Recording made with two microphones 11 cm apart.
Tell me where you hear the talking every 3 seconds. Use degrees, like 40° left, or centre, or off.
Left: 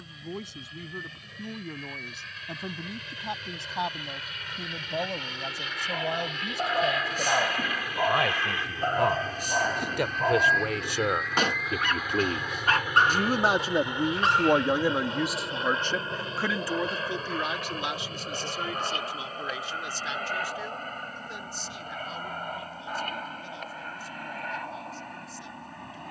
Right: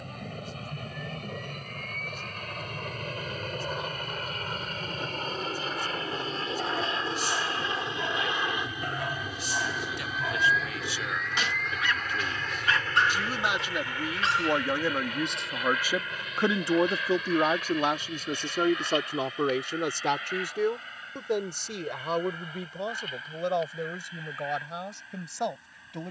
80° left, 80° left, 70° left, 60° left, 40° left, 20° right, 60° right, 70° right, 80° right.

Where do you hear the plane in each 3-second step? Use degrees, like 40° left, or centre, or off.
60° right, 50° right, 30° right, centre, 20° left, 30° left, 40° left, 50° left, 50° left.